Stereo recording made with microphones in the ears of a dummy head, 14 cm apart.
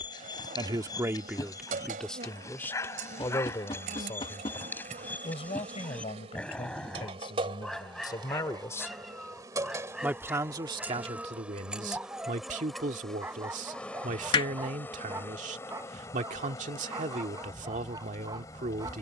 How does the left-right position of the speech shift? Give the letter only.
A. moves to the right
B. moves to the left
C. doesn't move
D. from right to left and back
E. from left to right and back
D.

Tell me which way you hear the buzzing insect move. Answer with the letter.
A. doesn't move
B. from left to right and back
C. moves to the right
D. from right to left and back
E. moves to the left
E.